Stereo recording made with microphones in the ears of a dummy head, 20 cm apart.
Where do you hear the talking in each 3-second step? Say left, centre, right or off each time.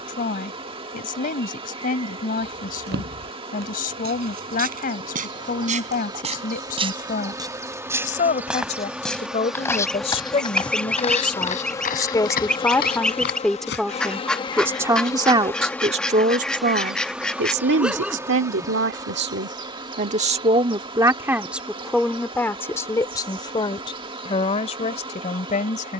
left, left, left, left, centre, right, right, centre, left.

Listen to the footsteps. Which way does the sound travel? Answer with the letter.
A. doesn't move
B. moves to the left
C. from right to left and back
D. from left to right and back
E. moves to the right
B.